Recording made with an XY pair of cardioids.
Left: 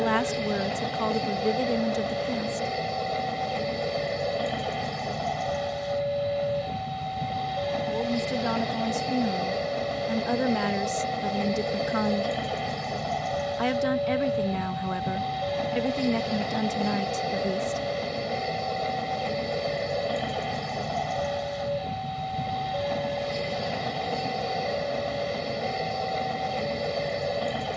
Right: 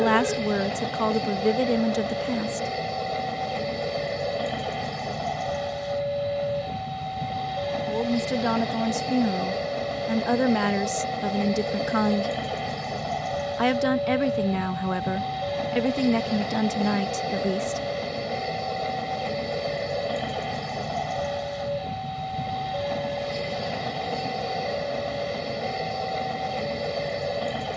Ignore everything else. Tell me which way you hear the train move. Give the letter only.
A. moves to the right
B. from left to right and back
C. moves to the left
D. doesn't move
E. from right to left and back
D.